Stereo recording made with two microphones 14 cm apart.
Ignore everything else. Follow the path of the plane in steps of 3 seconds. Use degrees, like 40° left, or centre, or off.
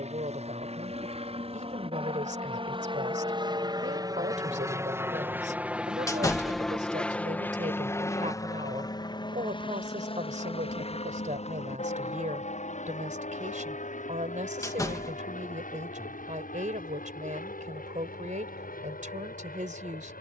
50° right, 20° right, 10° left, 40° left, 60° left, 60° left, 70° left.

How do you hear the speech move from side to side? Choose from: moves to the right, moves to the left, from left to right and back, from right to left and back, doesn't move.
doesn't move.